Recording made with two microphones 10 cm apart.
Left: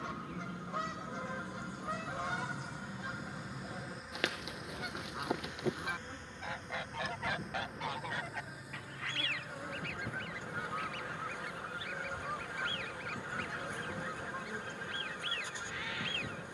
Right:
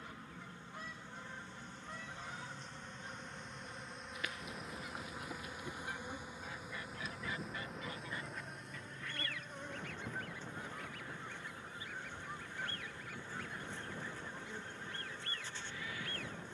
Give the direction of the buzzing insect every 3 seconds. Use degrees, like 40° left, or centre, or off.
10° left, centre, centre, 10° left, 20° left, 20° left.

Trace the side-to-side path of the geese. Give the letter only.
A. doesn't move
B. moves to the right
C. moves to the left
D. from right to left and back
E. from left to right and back
A.